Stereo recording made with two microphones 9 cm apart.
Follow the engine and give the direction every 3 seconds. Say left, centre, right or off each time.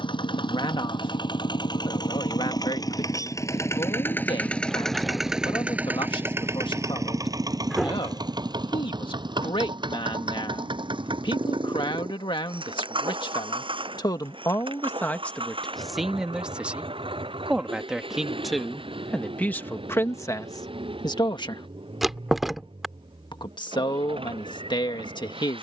left, centre, right, right, right, right, right, right, right.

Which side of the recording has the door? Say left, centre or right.
centre.